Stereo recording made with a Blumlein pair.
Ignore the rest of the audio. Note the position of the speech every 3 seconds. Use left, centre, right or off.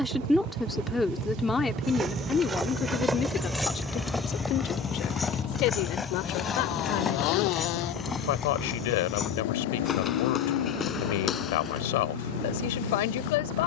centre, left, left, left, left.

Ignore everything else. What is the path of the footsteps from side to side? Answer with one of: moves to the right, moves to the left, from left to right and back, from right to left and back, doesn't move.
moves to the left.